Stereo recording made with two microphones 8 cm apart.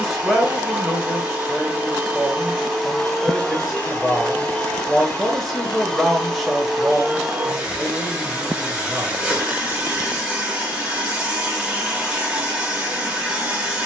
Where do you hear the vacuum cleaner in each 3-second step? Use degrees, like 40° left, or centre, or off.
10° right, 10° left, 10° right, 10° right, 10° right.